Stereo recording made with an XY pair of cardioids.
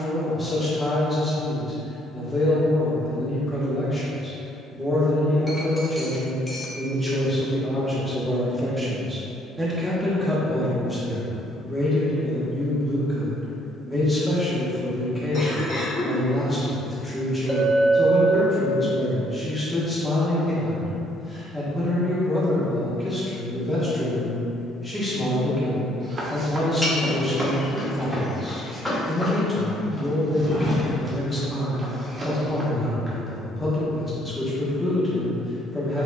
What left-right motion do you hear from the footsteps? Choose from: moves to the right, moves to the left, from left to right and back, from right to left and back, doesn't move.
from right to left and back.